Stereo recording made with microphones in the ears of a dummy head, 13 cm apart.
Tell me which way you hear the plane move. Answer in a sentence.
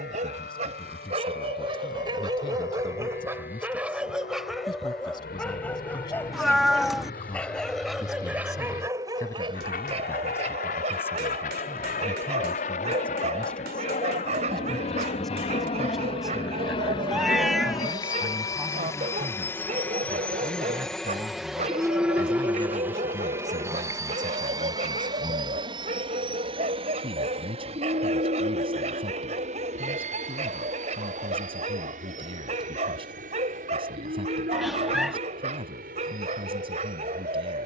In this clip you hear the plane travel towards the right.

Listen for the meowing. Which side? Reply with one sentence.
In this clip you hear the meowing in the centre.